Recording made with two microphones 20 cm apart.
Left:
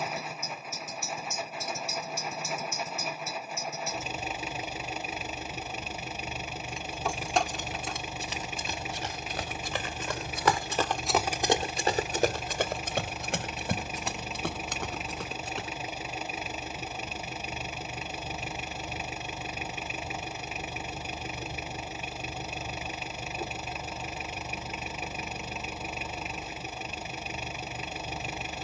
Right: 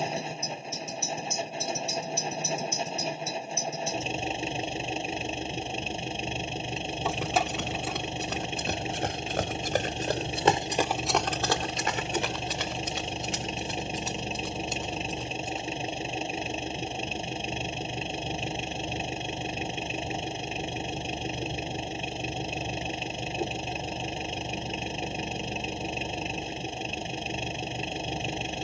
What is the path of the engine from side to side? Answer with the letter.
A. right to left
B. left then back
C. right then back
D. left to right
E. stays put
E.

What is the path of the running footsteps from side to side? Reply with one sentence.
In this clip you hear the running footsteps move to the left.